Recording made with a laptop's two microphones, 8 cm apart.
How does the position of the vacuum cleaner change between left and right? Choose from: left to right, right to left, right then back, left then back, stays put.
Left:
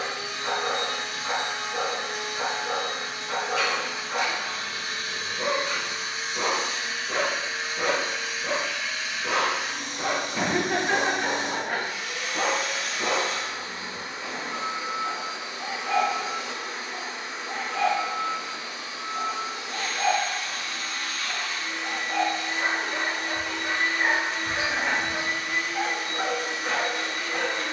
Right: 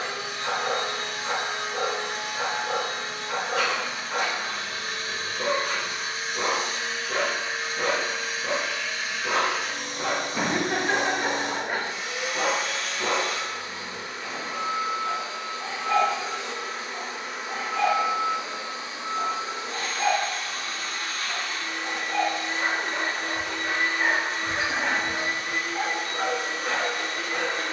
left then back.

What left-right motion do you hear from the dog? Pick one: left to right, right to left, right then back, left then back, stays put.
stays put.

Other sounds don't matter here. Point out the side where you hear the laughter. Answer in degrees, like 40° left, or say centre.
centre.